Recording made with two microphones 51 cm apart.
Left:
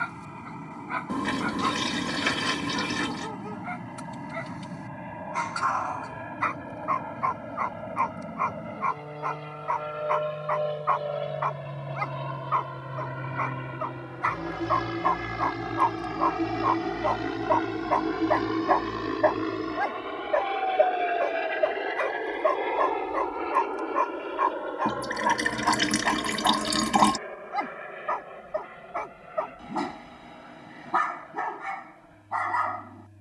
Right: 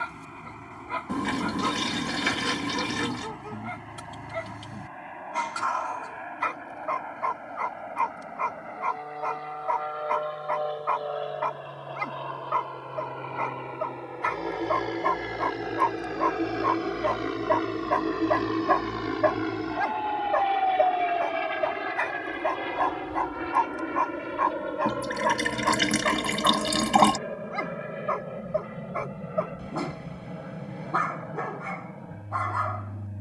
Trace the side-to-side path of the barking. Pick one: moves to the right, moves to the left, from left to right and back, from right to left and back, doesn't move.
moves to the left.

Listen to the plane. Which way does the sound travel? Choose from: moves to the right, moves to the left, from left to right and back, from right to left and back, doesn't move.
moves to the right.